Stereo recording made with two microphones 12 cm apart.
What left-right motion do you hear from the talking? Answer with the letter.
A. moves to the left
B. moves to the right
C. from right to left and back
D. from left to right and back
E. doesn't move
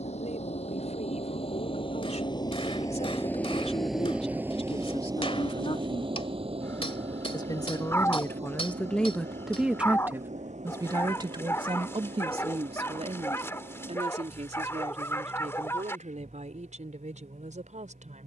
B.